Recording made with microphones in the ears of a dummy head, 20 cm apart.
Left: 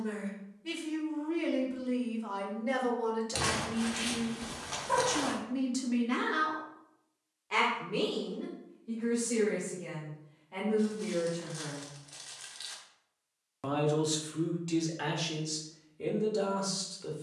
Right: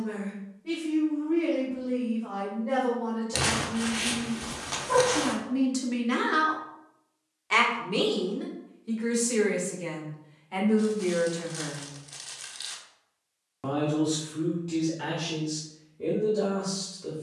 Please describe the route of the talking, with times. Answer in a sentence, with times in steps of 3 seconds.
In this clip you hear the talking on the left from 0 s, on the right from 6 s and on the left from 12 s.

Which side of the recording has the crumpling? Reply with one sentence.
In this clip you hear the crumpling in the centre.